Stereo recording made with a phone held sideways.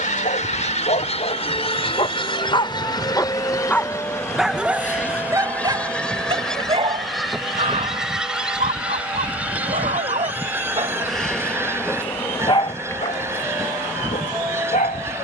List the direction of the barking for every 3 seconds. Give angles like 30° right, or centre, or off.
50° left, 10° right, 50° right, 40° right, 40° left.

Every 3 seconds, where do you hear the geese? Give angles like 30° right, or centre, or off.
40° left, 20° left, centre, 10° right, 20° right.